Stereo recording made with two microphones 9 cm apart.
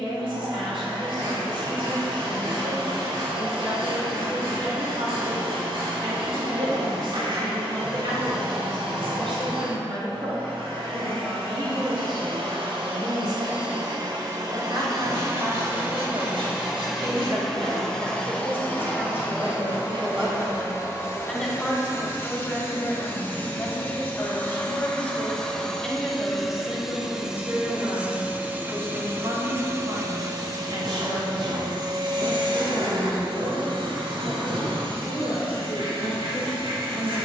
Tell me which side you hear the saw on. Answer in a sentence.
In this clip you hear the saw on the right.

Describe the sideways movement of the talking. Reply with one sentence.
You can hear the talking move from right to left and back again.